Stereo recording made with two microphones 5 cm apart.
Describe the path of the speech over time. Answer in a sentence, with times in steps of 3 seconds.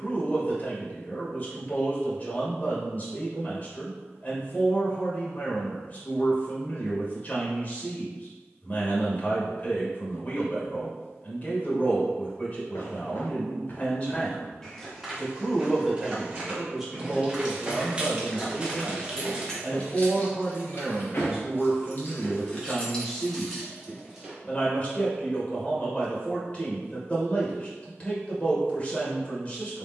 In this clip you hear the speech on the left from 0 s, in the centre from 15 s, on the right from 18 s, in the centre from 21 s and on the left from 24 s.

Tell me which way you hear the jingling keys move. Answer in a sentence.
In this clip you hear the jingling keys move from right to left and back again.